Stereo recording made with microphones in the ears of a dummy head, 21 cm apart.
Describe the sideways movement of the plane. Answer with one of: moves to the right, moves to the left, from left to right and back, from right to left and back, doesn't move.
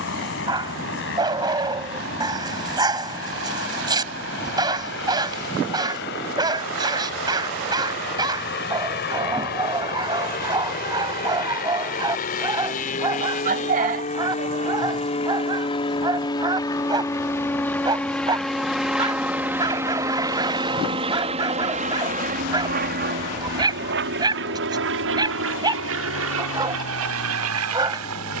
moves to the right.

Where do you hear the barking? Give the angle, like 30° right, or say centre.
20° right.